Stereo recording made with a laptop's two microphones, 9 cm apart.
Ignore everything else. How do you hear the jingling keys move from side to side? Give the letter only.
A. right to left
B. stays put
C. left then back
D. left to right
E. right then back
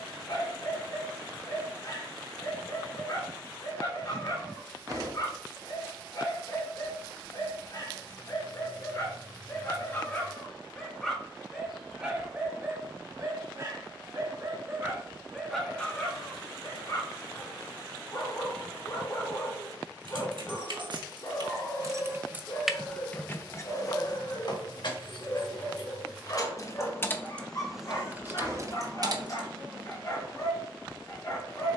C.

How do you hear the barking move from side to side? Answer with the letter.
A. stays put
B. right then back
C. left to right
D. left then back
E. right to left
B.